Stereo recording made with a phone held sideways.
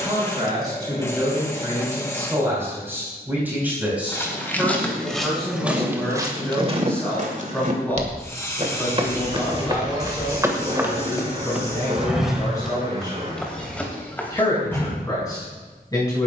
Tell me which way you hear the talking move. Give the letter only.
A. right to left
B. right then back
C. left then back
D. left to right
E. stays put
A.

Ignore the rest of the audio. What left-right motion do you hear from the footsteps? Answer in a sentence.
You can hear the footsteps move from left to right and back again.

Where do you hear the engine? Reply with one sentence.
In this clip you hear the engine on the right.